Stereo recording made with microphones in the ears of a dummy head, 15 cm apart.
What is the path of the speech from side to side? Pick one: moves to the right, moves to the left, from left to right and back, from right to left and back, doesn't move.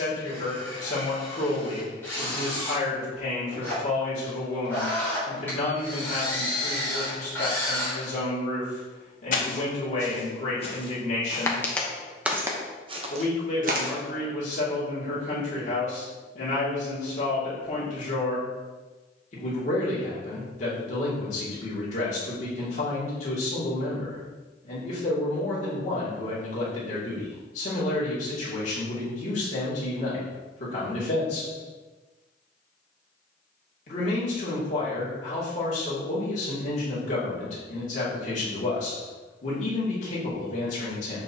doesn't move.